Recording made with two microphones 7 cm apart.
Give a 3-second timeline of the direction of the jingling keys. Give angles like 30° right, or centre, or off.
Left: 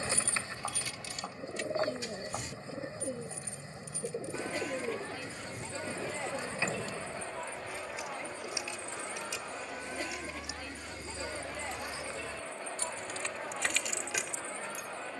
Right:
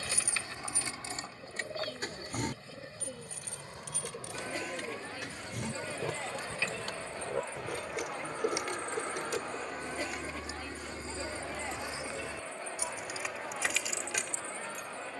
30° right, 70° right, 60° right, 40° right, centre.